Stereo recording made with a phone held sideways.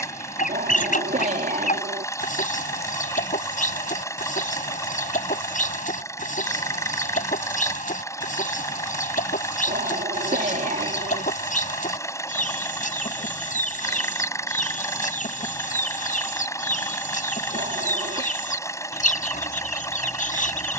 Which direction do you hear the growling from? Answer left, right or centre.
right.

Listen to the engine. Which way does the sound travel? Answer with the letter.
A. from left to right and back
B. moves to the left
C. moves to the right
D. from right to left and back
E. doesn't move
E.